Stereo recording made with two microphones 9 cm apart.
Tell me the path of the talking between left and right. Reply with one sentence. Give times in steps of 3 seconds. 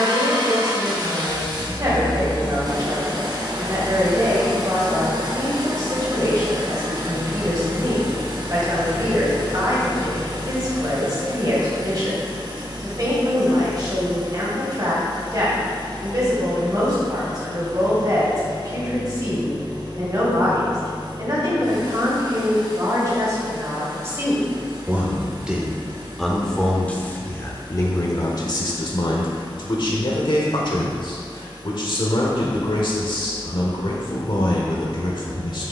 In this clip you hear the talking on the right from 0 s, in the centre from 24 s and on the left from 27 s.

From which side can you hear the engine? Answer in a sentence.
You can hear the engine on the right.